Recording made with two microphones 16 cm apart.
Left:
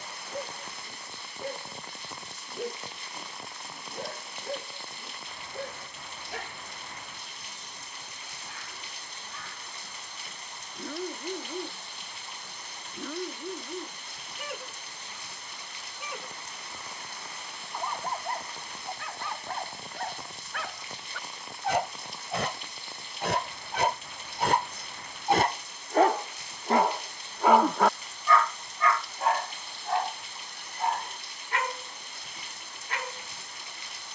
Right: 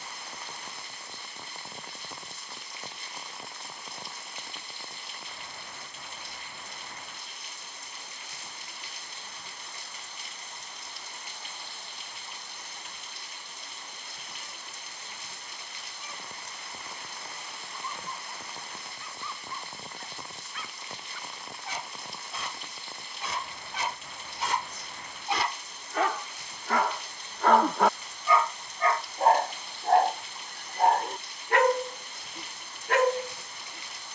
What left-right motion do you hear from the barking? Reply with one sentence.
You can hear the barking move to the right.